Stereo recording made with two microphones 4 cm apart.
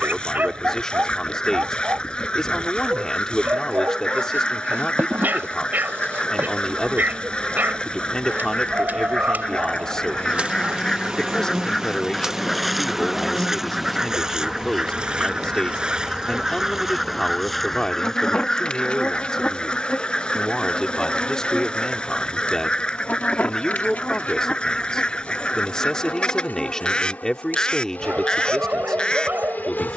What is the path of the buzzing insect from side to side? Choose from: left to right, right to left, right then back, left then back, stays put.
right to left.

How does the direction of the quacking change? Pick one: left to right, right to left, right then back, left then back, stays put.
right then back.